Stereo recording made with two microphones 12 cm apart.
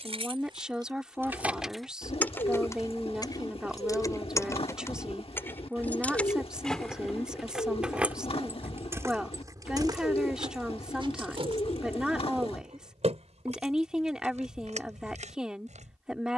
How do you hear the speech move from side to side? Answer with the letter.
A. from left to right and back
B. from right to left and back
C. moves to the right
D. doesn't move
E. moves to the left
D.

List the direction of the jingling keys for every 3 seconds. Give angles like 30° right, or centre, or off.
10° right, 20° left, centre, 40° right, 60° right, 70° right.